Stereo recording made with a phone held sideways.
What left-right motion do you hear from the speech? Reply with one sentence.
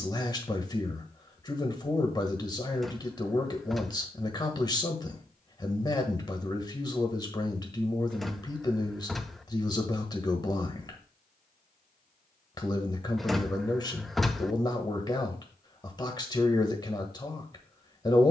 In this clip you hear the speech stay put.